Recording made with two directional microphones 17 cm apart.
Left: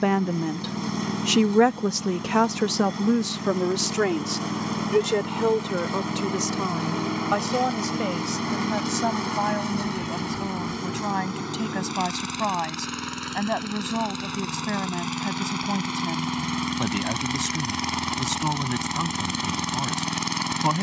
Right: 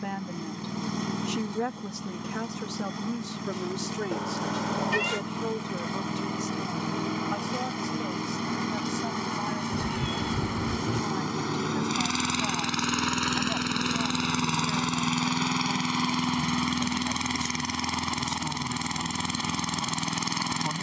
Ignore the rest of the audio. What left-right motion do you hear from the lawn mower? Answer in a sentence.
You can hear the lawn mower move from left to right and back again.